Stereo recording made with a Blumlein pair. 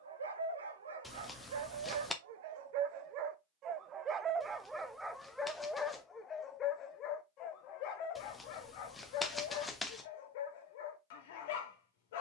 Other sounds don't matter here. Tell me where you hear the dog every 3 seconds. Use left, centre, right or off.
right, centre, left, left.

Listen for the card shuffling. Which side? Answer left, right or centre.
centre.